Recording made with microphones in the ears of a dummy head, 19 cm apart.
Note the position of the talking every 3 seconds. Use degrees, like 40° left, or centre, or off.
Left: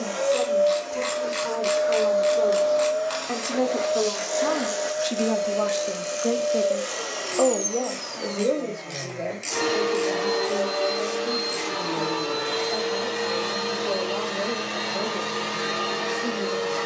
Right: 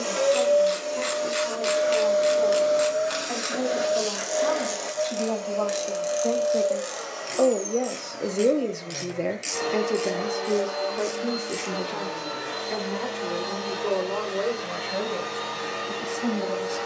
60° left, 40° left, 10° right, 60° right, 80° right, 80° right.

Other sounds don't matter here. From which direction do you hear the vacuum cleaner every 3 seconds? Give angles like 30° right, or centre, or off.
40° right, centre, 50° left, 70° left, 70° left, 80° left.